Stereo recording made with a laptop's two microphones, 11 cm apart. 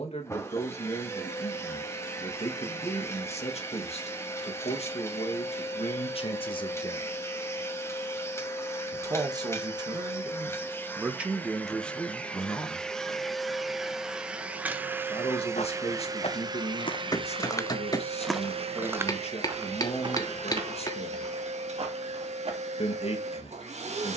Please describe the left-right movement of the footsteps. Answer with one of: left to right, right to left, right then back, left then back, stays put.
left to right.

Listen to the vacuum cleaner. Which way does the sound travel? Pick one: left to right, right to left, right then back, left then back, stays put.
left to right.